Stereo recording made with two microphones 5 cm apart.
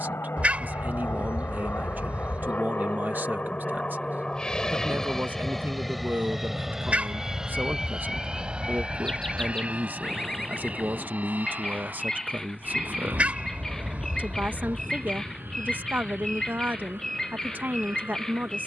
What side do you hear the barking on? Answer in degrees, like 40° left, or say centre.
30° right.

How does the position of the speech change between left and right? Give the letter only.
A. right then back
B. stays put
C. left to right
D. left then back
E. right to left
B.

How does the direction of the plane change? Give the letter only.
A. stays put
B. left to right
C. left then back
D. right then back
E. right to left
B.